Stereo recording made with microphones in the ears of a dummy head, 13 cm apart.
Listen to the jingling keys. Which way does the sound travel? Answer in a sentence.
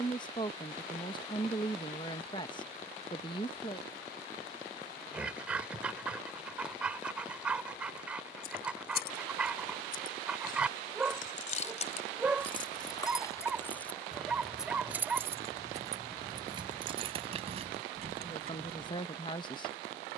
You can hear the jingling keys go from the left side to the right.